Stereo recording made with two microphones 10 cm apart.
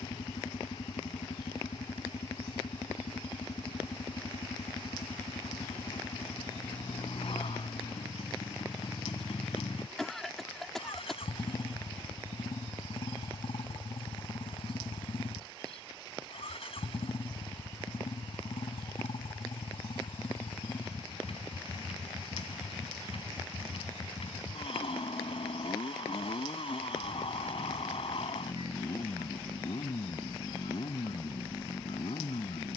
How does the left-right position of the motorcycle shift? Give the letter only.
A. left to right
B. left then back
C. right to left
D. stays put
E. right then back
D.